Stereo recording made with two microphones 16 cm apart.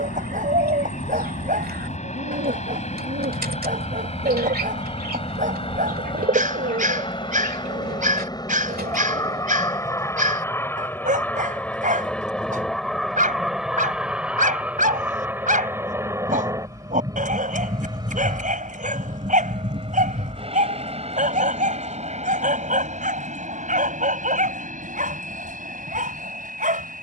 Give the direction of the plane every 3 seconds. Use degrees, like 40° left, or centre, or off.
50° left, 40° left, 30° left, 10° left, centre, 20° right, 30° right, 40° right, 50° right.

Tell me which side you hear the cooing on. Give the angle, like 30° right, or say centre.
70° right.